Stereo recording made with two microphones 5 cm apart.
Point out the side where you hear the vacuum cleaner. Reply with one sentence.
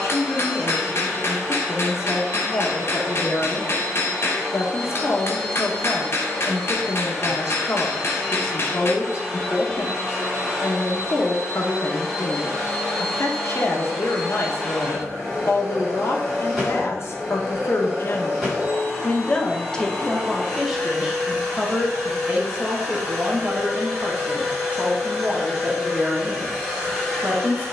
You can hear the vacuum cleaner in the centre.